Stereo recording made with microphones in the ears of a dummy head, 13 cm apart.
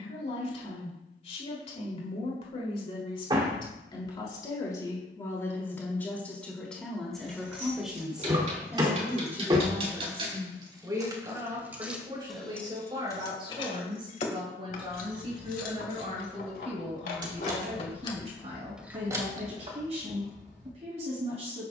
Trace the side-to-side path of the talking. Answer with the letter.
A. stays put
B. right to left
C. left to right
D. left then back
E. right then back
C.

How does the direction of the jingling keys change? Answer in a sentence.
In this clip you hear the jingling keys move from right to left and back again.